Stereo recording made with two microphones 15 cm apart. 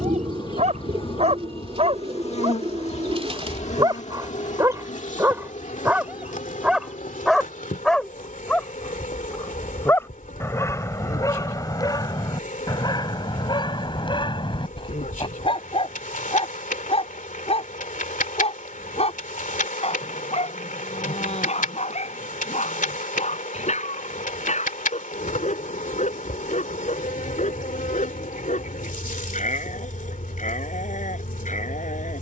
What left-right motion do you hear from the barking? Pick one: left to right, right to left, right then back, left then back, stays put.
right to left.